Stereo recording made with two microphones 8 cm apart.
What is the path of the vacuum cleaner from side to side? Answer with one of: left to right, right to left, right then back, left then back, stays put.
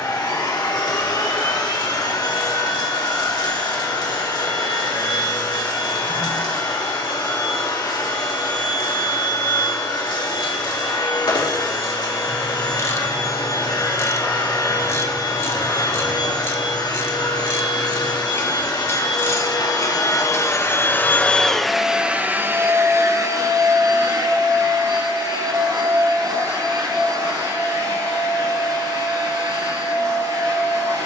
left to right.